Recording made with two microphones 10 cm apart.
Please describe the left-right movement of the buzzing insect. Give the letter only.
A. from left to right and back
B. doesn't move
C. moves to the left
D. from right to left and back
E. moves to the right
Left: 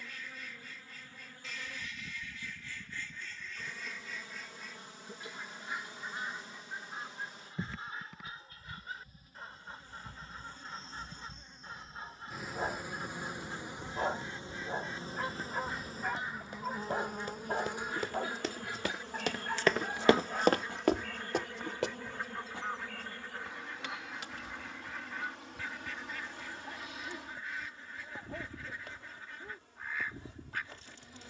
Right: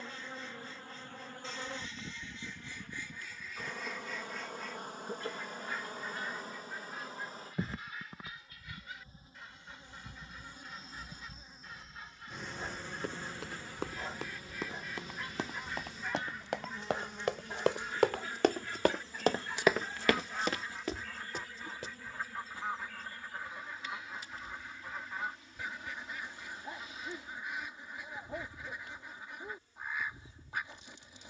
C.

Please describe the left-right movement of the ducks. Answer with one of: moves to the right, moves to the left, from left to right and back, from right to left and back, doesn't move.
from right to left and back.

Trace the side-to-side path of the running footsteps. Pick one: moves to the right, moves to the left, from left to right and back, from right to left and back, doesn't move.
moves to the left.